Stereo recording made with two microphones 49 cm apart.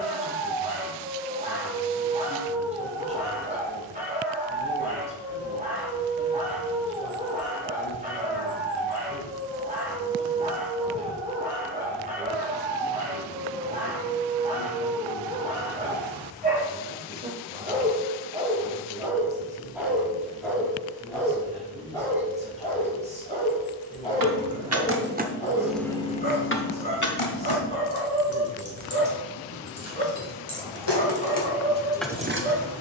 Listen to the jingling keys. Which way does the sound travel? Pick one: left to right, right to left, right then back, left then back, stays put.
left then back.